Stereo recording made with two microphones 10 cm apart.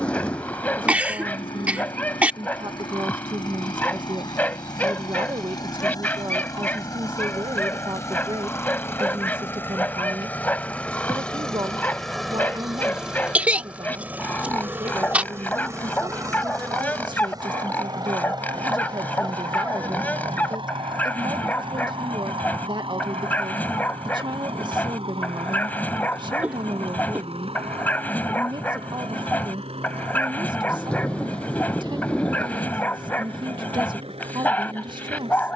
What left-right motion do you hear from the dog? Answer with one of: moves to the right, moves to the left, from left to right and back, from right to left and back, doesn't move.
doesn't move.